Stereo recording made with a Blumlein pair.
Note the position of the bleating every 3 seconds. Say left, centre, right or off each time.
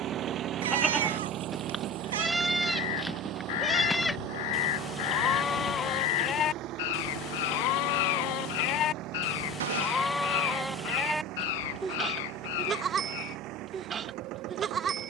centre, centre, left, centre, right.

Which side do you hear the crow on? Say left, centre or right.
left.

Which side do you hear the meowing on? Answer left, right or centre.
right.